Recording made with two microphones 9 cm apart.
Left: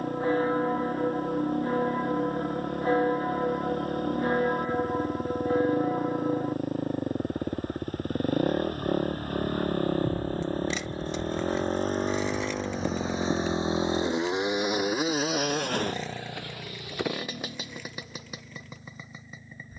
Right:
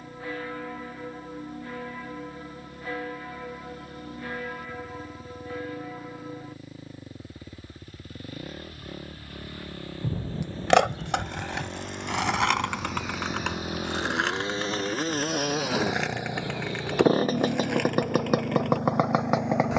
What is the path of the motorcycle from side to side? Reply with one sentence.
In this clip you hear the motorcycle travel towards the right.